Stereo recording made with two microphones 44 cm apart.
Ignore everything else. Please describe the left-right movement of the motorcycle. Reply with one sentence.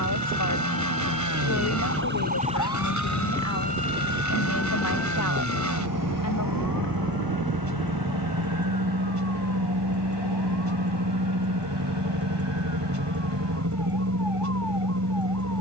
In this clip you hear the motorcycle stay put.